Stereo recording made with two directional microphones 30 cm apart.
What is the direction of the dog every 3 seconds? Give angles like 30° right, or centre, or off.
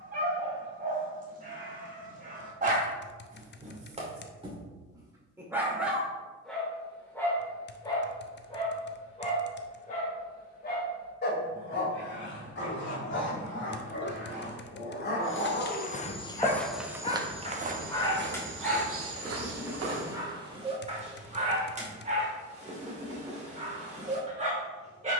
30° right, 10° right, 10° left, 30° left, 40° left, 30° left, centre, 20° right, 20° right.